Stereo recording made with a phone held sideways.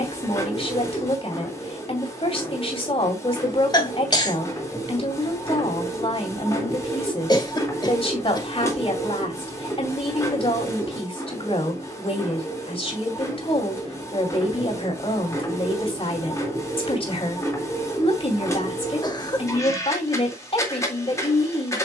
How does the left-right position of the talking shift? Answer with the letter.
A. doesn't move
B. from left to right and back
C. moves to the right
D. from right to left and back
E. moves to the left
A.